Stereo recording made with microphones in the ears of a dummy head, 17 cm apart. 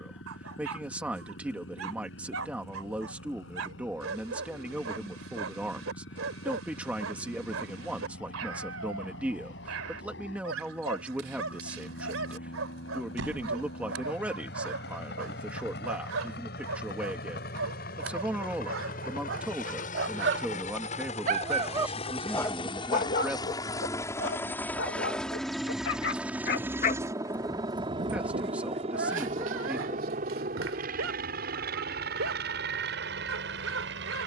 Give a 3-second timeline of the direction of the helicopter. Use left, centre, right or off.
left, left, left, left, left, left, left, left, centre, right, right, right.